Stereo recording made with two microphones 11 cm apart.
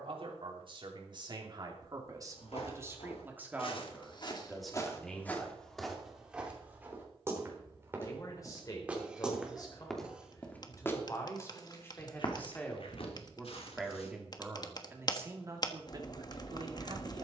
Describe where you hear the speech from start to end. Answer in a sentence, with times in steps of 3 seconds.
You can hear the speech on the right from 0 s, in the centre from 3 s, on the left from 6 s, in the centre from 12 s and on the right from 15 s.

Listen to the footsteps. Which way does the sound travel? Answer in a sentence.
You can hear the footsteps move from left to right and back again.